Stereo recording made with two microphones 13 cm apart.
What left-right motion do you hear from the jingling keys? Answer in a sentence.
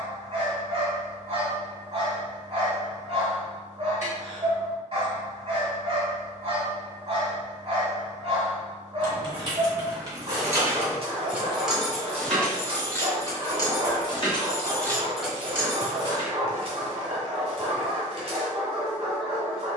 In this clip you hear the jingling keys move from right to left and back again.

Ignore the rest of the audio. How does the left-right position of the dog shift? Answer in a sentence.
In this clip you hear the dog stay put.